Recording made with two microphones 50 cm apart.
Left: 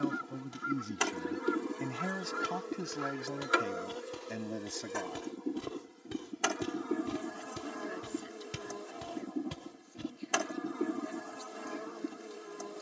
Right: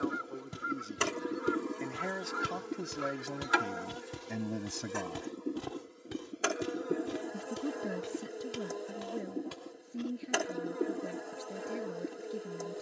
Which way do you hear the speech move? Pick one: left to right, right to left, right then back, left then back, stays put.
left to right.